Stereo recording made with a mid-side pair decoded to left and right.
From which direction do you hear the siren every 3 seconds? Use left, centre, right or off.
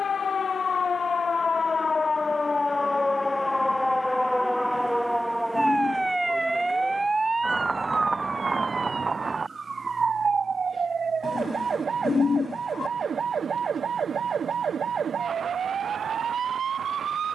left, centre, right, right, right, right.